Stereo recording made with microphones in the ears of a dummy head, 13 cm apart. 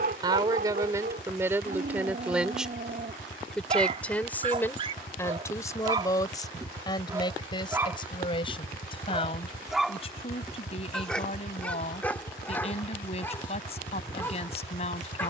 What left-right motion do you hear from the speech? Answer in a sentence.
In this clip you hear the speech travel towards the left.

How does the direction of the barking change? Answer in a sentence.
You can hear the barking travel towards the left.